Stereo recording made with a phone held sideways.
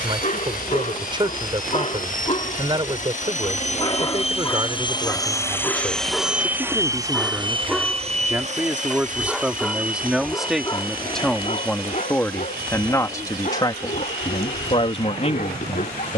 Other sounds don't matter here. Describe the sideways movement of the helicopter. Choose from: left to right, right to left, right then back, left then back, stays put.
left to right.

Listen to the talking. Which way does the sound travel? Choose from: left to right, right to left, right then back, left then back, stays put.
right to left.